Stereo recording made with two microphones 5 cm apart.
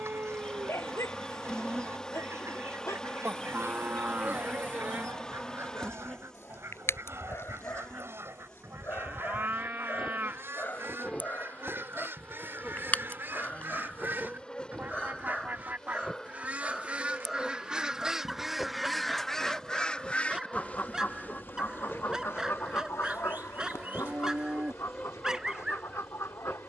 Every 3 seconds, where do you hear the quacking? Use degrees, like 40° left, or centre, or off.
60° right, 60° right, 60° right, 50° right, 50° right, 30° right, 10° left, 60° left, 80° left.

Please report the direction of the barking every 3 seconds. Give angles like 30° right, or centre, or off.
70° left, 60° left, 50° left, 40° left, 30° left, 10° left, 10° right, 10° right, 10° right.